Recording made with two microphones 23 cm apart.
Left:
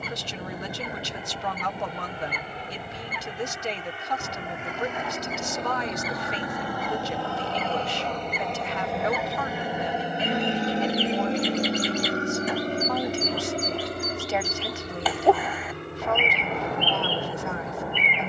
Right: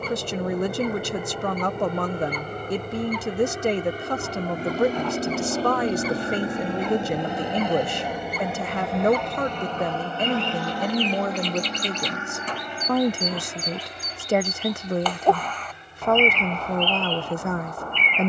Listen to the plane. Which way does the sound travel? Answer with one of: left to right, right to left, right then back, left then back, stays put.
right to left.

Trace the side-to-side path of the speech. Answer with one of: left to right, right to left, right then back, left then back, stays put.
stays put.